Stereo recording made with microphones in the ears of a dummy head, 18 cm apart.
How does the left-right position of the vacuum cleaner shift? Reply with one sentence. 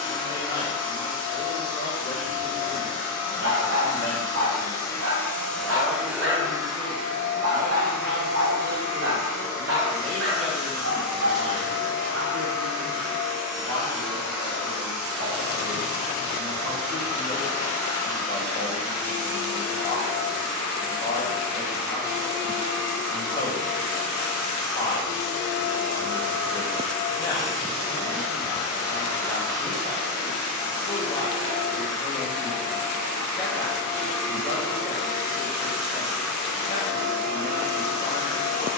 You can hear the vacuum cleaner move to the right.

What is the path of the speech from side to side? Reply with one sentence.
In this clip you hear the speech go right and come back.